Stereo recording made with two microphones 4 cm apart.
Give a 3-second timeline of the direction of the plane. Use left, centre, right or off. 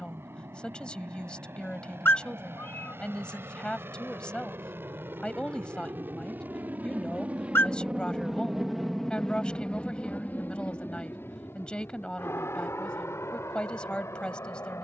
right, right, right, left, left.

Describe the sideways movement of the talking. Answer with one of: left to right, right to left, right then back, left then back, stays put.
stays put.